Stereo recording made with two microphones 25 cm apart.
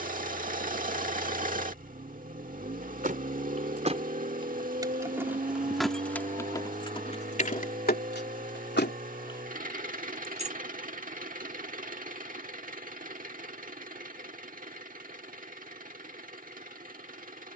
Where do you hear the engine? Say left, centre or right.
right.